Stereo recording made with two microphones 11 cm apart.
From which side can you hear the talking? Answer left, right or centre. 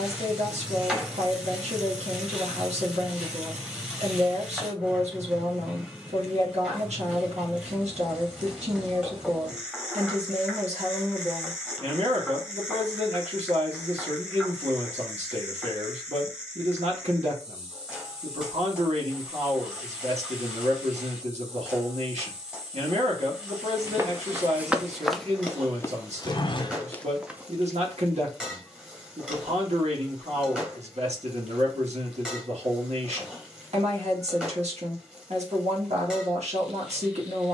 right.